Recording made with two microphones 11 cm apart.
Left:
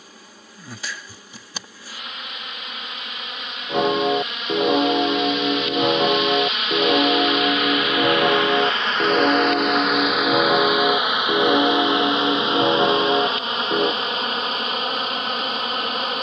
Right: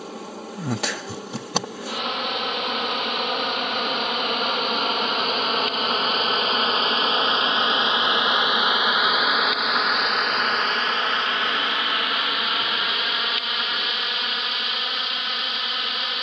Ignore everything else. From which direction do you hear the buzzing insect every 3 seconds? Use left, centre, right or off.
right, right, right, centre, left, left.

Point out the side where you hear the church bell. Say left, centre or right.
left.